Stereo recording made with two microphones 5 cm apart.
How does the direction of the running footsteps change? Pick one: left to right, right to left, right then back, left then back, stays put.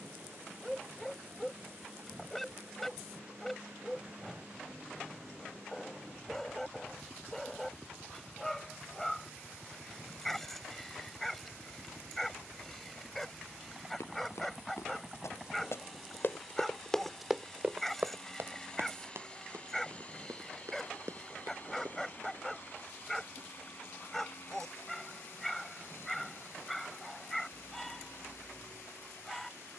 left to right.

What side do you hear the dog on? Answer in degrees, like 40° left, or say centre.
10° left.